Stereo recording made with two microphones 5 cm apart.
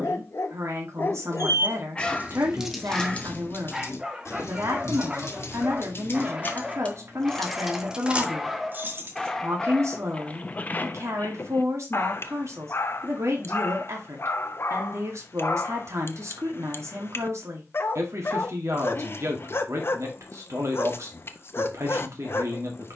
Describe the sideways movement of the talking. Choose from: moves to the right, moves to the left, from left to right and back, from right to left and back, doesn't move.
doesn't move.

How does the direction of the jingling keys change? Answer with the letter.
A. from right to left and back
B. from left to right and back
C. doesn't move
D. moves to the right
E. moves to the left
A.